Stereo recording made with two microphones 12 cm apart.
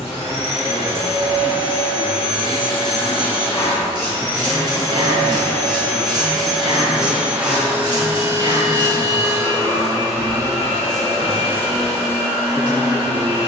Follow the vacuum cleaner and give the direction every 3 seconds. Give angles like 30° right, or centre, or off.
70° left, 30° left, 10° right, 40° right, 50° right.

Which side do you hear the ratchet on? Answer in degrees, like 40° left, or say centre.
40° right.